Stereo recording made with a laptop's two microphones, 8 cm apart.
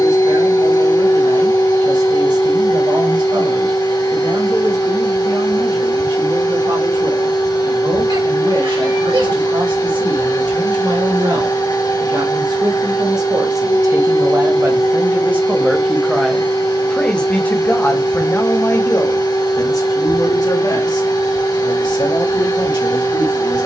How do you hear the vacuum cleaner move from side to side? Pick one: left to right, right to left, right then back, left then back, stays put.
stays put.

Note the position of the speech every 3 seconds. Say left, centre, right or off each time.
right, right, right, right, right, centre, left, left.